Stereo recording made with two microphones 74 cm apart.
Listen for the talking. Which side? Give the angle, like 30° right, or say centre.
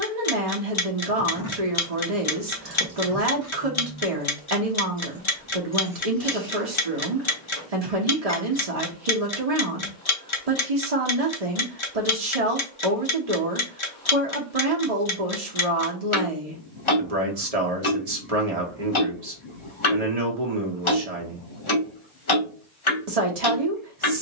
50° right.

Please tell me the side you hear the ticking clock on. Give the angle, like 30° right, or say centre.
40° left.